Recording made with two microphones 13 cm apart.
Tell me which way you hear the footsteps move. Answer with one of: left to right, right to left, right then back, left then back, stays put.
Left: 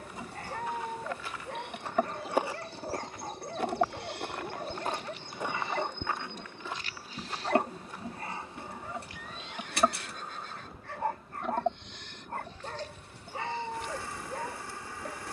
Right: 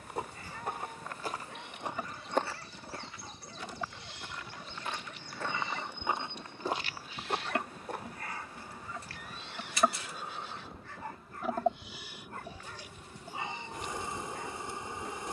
left then back.